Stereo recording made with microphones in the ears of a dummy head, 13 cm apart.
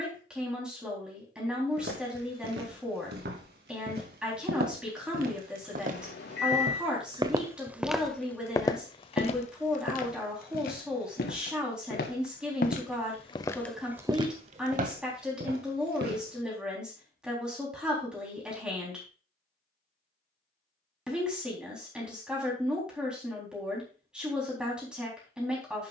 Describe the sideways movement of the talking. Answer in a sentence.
In this clip you hear the talking stay in one place.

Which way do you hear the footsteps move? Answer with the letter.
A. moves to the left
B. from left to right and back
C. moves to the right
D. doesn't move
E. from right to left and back
E.